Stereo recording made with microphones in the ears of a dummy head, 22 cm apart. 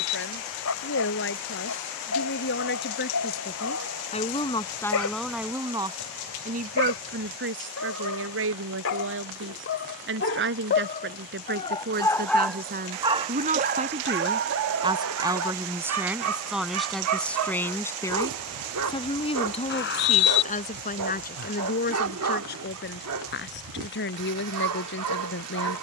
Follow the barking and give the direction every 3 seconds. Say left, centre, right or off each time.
left, left, left, left, right, right, right, right, right.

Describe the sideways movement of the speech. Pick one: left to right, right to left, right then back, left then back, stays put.
right then back.